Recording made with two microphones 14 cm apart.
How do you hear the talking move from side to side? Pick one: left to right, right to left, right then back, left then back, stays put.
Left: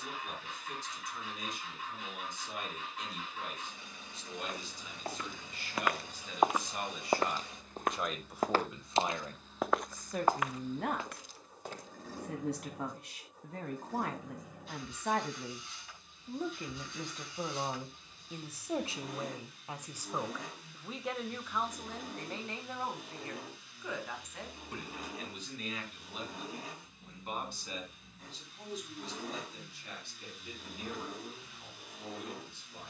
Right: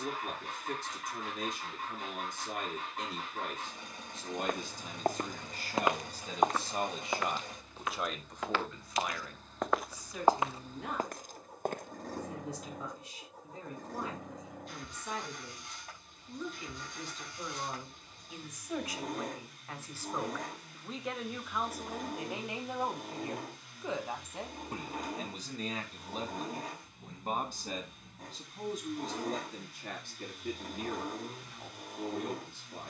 left then back.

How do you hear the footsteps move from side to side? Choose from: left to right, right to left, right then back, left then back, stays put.
left then back.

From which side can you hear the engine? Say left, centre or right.
right.